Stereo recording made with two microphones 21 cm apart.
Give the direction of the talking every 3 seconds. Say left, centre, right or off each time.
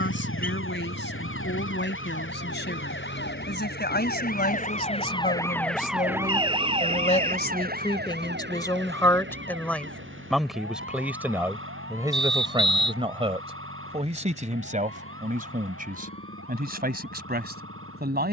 left, left, left, centre, right, right.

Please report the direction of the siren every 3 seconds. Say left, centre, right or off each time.
left, left, right, right, right, right.